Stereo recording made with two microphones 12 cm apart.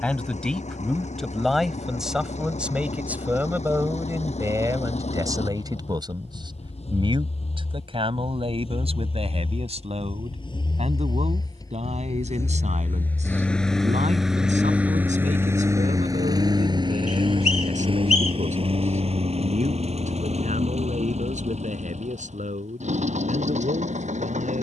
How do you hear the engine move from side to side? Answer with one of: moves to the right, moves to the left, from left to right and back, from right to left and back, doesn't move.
moves to the right.